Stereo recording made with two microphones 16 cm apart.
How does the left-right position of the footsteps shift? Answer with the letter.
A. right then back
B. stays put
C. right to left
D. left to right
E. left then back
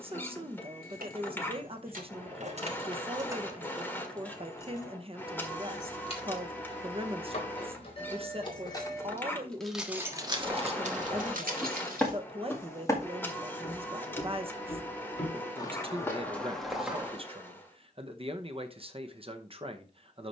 E.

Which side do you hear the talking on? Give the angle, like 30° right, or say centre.
40° right.